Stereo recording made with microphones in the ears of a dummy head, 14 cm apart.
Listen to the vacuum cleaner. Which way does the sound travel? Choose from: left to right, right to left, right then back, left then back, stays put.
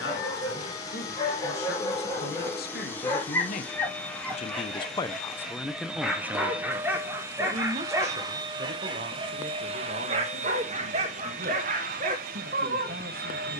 left to right.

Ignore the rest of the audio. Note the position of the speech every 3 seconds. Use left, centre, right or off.
left, left, right, right, right.